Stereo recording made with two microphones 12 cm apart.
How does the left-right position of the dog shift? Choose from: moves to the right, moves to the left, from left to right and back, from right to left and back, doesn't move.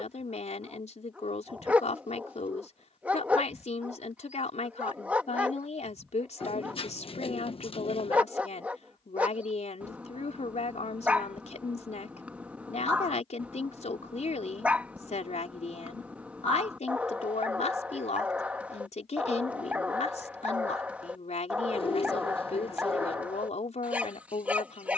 doesn't move.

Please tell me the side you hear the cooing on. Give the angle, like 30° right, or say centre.
50° left.